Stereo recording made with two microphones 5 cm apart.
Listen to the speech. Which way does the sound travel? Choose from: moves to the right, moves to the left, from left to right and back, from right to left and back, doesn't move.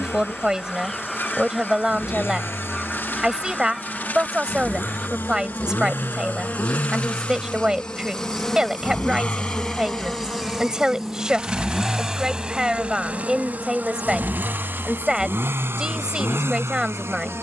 doesn't move.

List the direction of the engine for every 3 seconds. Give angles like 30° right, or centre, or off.
60° left, 50° left, 40° left, 10° left, 30° right, 60° right.